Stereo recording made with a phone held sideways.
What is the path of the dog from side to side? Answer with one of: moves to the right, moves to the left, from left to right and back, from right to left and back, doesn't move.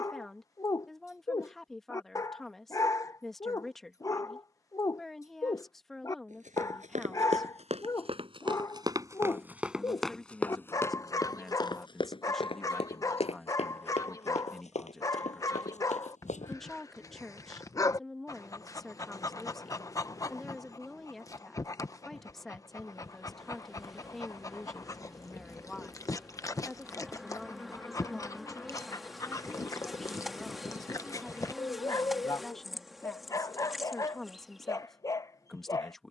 doesn't move.